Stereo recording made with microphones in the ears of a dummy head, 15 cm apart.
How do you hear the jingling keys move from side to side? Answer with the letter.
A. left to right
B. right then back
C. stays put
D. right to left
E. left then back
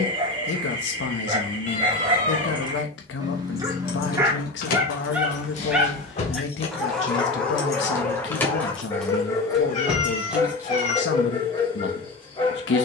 A.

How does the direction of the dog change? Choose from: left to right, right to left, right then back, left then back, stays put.
right to left.